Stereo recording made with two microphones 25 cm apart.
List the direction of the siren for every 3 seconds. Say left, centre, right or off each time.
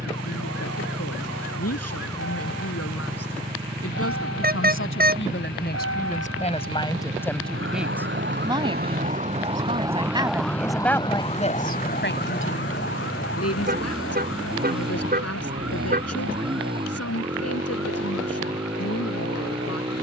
right, right, right, centre, left, left, left.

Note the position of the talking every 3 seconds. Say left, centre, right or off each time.
left, left, centre, centre, left, left, left.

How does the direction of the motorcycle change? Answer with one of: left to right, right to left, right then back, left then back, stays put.
stays put.